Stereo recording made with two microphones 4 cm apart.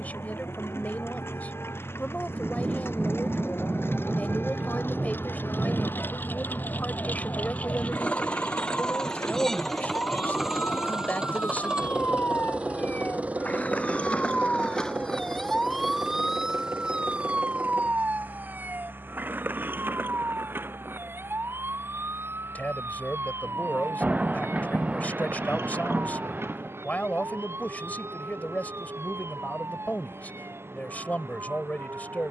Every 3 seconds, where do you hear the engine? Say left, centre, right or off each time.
left, left, left, centre, right, right, right, right, right, right, right.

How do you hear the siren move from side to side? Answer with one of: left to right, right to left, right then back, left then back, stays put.
left to right.